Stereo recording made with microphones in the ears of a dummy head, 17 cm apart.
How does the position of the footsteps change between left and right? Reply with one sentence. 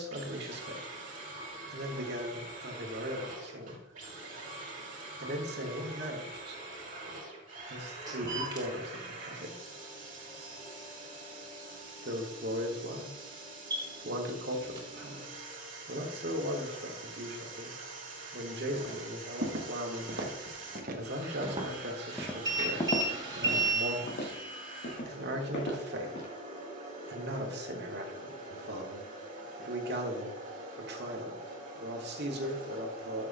In this clip you hear the footsteps travel towards the left.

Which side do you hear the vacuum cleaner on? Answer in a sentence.
You can hear the vacuum cleaner on the right.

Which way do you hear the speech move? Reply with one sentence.
In this clip you hear the speech stay in one place.